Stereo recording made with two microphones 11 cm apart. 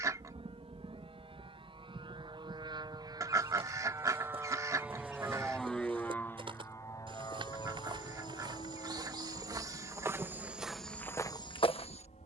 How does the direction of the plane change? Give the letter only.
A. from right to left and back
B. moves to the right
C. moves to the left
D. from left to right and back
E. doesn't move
C.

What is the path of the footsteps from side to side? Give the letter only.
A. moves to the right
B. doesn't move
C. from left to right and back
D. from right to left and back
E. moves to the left
E.